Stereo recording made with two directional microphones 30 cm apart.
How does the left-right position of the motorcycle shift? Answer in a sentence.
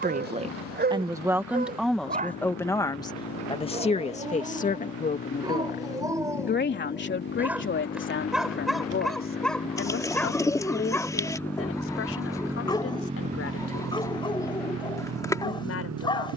In this clip you hear the motorcycle move from left to right.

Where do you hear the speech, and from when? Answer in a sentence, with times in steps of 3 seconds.
In this clip you hear the speech in the centre from 0 s and on the left from 3 s.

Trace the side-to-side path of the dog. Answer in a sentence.
In this clip you hear the dog go from the right side to the left.